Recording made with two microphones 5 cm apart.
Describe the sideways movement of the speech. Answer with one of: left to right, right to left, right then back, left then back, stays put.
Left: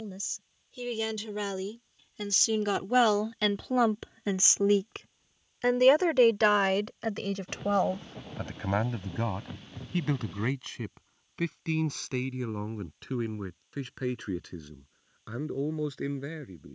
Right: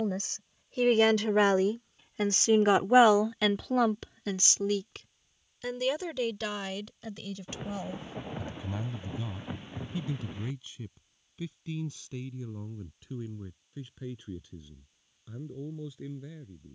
right to left.